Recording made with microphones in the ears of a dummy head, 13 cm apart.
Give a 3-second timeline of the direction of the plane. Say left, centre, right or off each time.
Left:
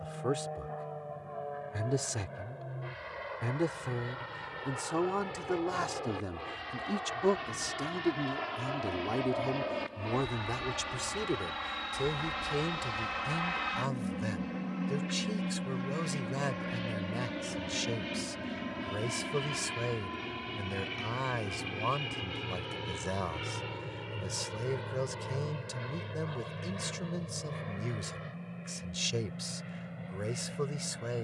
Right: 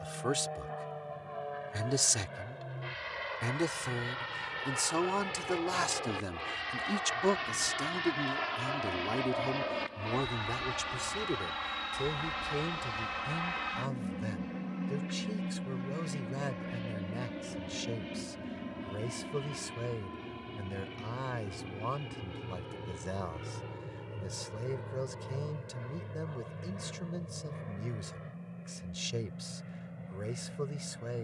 right, right, right, right, centre, left, left, left, left, left, left.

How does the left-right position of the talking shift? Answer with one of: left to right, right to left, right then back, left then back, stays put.
right to left.